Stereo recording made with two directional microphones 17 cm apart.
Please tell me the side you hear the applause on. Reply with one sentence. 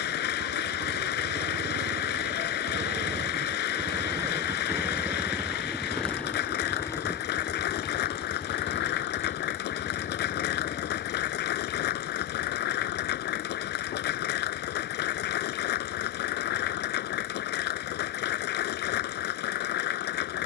You can hear the applause on the left.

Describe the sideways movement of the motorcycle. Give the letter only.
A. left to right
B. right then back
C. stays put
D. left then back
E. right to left
E.